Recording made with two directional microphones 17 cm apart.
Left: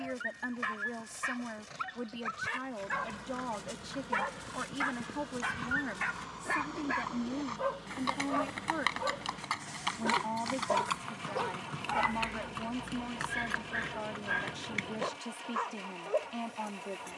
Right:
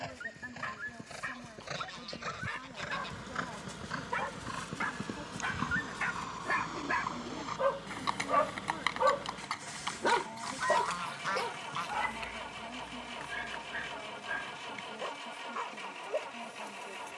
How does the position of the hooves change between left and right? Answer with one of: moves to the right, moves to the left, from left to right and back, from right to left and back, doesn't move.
moves to the left.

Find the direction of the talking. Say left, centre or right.
left.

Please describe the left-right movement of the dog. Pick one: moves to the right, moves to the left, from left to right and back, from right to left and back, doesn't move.
from left to right and back.